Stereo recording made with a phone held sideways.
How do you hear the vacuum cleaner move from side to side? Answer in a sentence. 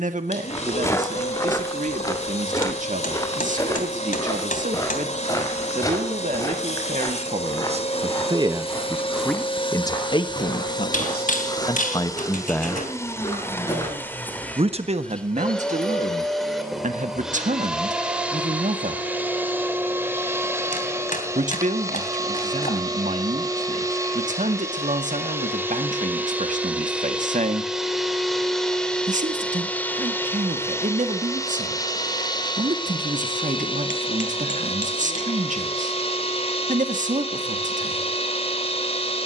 You can hear the vacuum cleaner move from left to right and back again.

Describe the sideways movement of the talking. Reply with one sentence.
You can hear the talking move from right to left and back again.